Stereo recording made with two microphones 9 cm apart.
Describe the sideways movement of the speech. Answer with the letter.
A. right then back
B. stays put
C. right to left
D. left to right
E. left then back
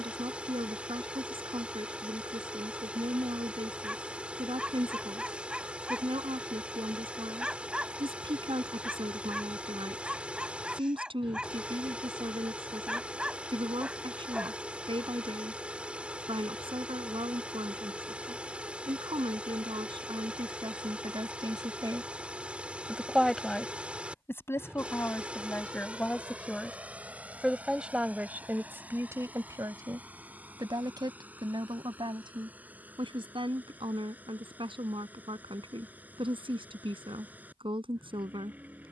E.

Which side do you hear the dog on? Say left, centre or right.
centre.